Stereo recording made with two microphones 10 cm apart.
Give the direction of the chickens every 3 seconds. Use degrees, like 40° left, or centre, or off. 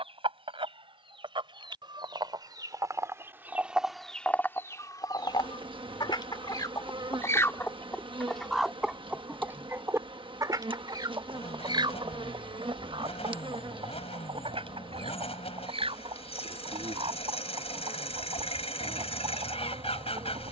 50° right, 10° left, 30° left, 30° right, 60° right, 60° right, 60° right.